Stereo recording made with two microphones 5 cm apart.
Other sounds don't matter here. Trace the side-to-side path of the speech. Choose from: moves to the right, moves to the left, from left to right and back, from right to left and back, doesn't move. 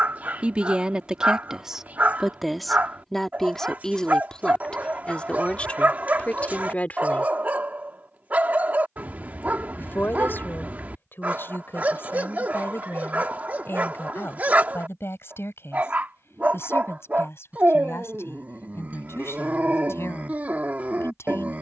moves to the left.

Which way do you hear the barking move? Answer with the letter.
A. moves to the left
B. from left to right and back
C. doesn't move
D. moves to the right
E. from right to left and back
C.